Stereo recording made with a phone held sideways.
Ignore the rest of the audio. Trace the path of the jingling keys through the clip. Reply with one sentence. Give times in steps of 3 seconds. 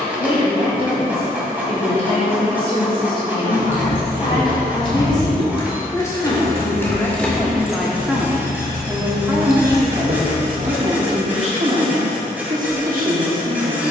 You can hear the jingling keys not at all from 0 s, on the left from 3 s, in the centre from 6 s, on the right from 9 s and not at all from 12 s.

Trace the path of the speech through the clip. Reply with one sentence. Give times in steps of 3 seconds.
In this clip you hear the speech on the left from 0 s, in the centre from 6 s and on the right from 9 s.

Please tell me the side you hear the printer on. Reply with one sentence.
You can hear the printer in the centre.